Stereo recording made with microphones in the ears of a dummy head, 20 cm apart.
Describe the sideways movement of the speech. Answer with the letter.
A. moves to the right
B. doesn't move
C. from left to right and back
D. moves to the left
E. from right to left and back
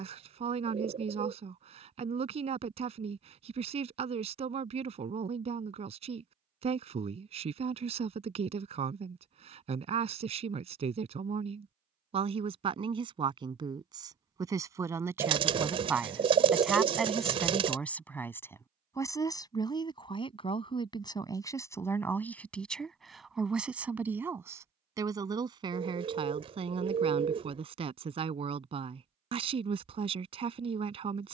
E.